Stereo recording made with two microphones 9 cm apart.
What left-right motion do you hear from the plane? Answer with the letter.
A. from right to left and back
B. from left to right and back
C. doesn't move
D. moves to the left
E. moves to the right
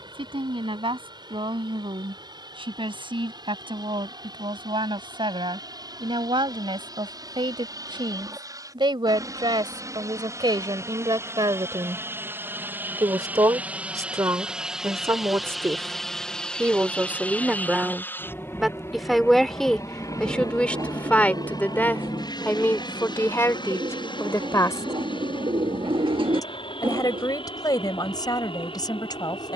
D.